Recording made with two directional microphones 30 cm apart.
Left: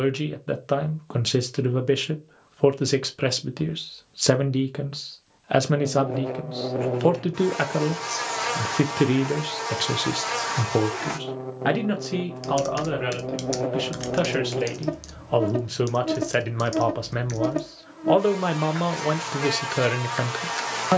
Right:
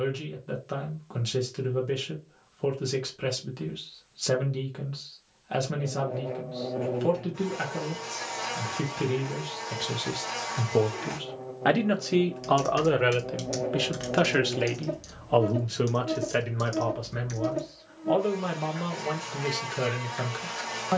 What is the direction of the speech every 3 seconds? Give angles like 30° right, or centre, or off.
50° left, 50° left, 50° left, 30° left, 10° right, 30° left, 40° left.